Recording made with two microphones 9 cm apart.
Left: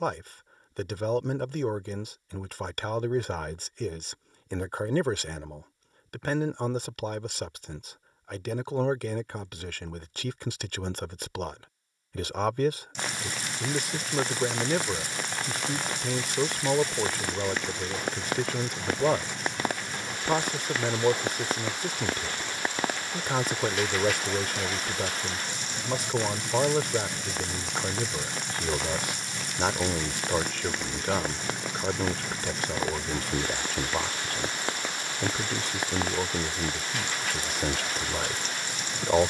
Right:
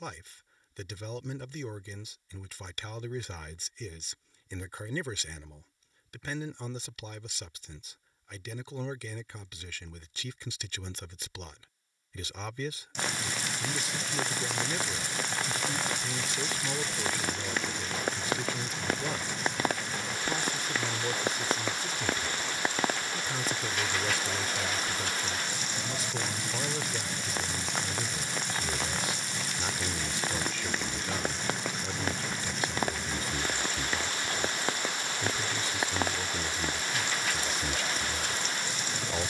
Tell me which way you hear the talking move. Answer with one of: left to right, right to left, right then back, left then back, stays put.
stays put.